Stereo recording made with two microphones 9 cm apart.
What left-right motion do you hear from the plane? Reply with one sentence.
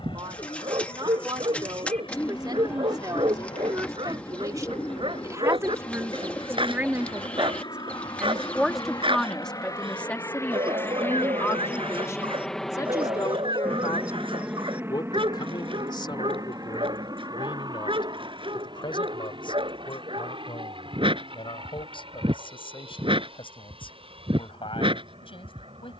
You can hear the plane travel towards the right.